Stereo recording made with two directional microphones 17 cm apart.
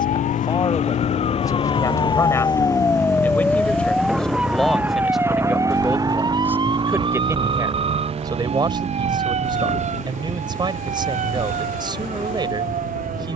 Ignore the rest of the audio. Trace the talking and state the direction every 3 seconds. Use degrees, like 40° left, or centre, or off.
20° left, centre, 20° right, 30° right, 30° right.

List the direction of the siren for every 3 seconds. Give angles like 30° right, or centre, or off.
40° left, 10° right, 30° right, 40° right, 50° right.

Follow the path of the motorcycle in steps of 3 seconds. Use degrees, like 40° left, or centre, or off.
40° left, centre, 30° right, 50° right, 60° right.